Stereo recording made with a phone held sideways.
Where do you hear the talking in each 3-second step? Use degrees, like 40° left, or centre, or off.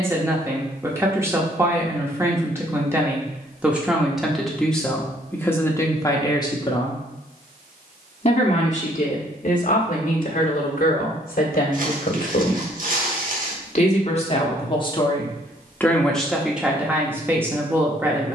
20° right, centre, 40° left, 60° left, 50° left, centre.